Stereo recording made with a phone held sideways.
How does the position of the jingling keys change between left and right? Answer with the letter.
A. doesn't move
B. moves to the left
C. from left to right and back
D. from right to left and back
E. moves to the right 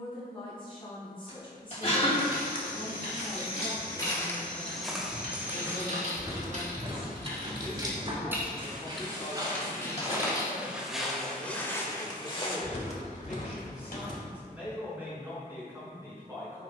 B.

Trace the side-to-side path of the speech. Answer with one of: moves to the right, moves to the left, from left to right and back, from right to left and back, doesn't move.
moves to the right.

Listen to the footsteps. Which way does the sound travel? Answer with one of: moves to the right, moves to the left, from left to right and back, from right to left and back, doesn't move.
from left to right and back.